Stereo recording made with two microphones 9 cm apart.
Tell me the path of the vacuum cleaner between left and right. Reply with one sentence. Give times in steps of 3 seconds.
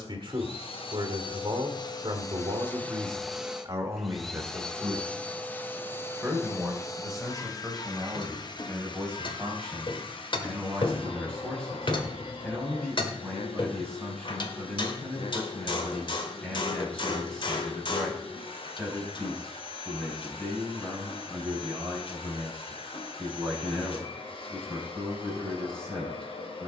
You can hear the vacuum cleaner on the left from 0 s, in the centre from 3 s and on the left from 6 s.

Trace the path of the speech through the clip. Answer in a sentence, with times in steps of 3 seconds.
You can hear the speech on the right from 0 s and in the centre from 6 s.